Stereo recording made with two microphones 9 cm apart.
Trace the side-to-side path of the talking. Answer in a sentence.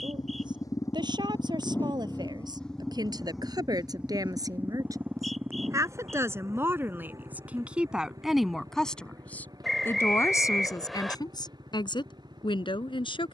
You can hear the talking go from the right side to the left.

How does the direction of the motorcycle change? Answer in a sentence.
You can hear the motorcycle travel towards the right.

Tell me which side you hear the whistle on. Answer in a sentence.
In this clip you hear the whistle in the centre.